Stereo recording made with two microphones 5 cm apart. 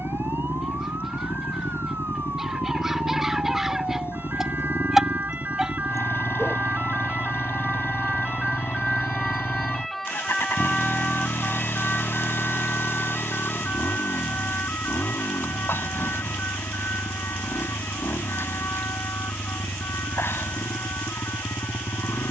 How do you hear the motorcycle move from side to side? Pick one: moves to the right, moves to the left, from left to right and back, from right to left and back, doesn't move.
doesn't move.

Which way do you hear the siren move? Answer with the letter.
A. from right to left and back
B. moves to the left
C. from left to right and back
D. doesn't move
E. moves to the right
B.